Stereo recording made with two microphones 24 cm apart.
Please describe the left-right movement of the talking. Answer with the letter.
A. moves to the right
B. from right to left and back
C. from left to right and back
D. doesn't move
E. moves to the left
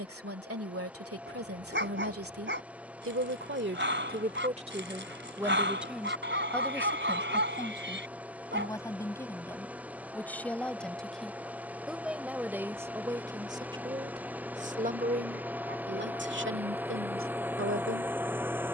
B.